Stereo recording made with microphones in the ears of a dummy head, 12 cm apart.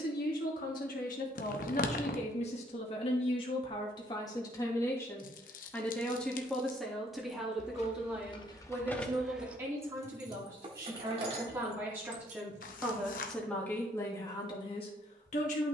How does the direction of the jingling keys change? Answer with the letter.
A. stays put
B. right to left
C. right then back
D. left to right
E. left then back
D.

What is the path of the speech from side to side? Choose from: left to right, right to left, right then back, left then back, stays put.
right then back.